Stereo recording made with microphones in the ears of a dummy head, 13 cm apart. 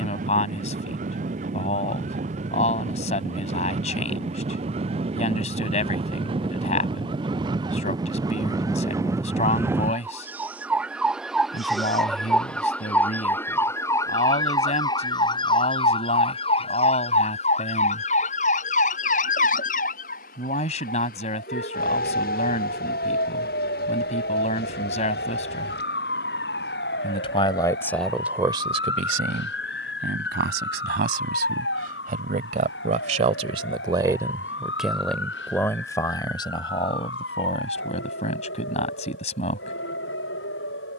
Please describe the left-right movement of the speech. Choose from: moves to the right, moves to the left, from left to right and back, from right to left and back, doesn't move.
from left to right and back.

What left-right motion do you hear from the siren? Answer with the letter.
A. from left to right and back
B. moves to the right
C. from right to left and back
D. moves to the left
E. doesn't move
D.